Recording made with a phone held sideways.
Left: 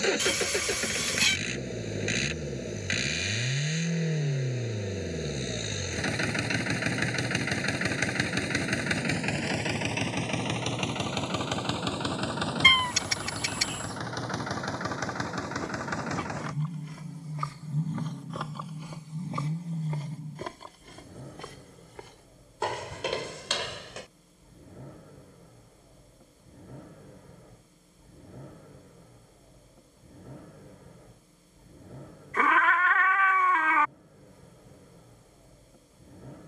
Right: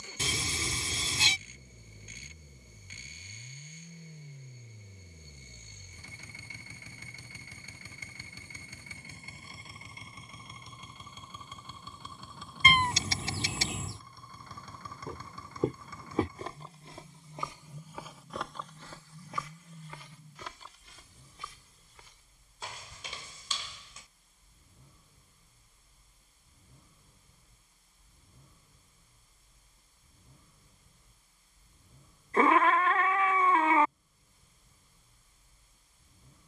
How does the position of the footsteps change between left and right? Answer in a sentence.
In this clip you hear the footsteps go from the right side to the left.